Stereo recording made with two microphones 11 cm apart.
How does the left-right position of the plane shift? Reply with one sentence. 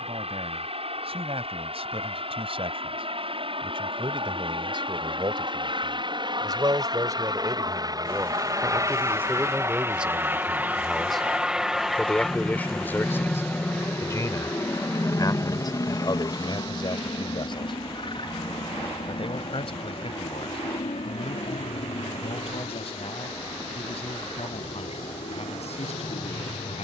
You can hear the plane travel towards the left.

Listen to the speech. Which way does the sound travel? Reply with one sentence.
You can hear the speech go from the right side to the left.